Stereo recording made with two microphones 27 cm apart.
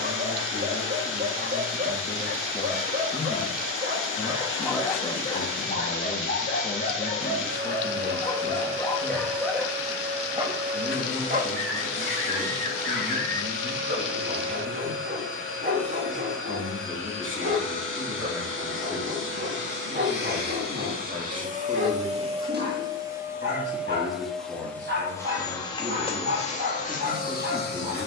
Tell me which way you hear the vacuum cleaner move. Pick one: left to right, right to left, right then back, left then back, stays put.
right to left.